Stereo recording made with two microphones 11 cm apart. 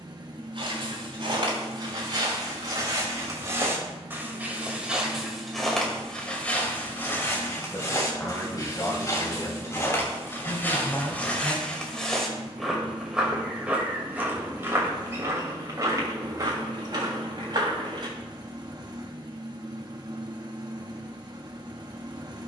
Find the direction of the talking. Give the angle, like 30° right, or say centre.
30° left.